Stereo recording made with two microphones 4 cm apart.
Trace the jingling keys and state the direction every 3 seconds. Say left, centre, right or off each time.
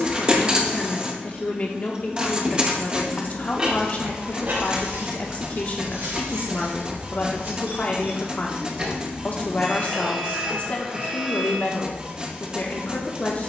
off, right, right, centre, off.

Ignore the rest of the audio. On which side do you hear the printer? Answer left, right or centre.
right.